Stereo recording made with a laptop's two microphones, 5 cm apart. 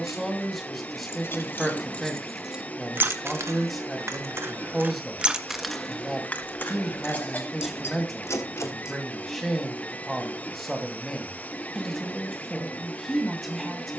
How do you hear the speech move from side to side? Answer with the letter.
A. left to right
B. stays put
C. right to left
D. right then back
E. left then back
B.